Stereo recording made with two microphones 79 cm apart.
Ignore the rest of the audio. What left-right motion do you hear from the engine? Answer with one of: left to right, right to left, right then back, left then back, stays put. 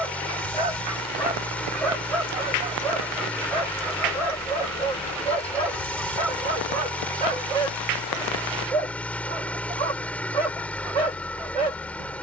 stays put.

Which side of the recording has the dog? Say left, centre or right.
right.